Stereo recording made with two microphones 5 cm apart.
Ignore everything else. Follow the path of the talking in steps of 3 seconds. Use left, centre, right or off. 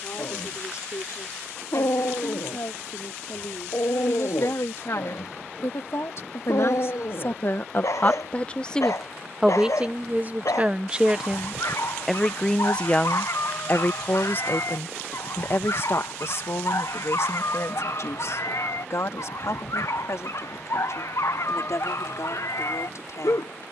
left, left, left, right, left, left, left, left.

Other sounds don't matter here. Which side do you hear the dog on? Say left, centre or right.
left.